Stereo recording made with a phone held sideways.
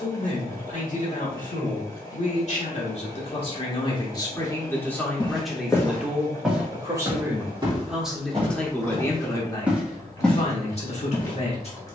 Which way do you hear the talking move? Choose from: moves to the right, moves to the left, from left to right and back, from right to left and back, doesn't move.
from left to right and back.